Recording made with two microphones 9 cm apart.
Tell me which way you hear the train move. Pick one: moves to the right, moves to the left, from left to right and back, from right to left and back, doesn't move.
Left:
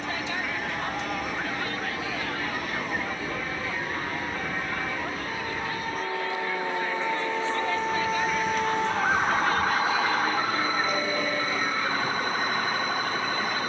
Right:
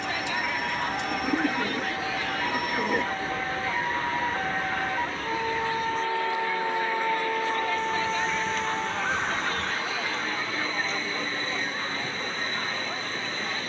doesn't move.